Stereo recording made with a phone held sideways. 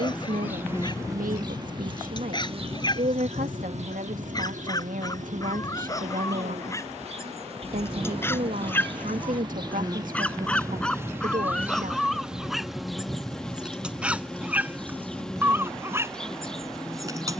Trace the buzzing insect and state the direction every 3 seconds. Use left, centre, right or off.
right, right, right, right, centre, centre.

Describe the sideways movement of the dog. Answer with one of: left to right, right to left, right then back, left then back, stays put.
left to right.